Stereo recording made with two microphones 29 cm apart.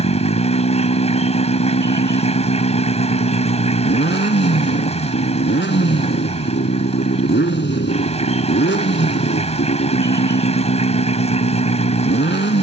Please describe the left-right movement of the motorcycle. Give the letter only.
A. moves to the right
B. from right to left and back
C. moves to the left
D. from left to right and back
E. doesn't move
E.